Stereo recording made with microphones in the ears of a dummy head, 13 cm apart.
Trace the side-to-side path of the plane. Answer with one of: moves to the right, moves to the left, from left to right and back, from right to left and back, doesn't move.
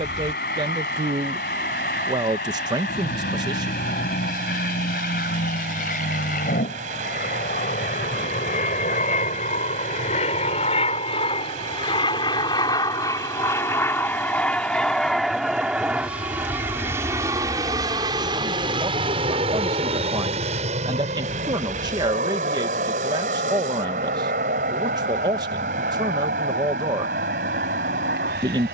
moves to the right.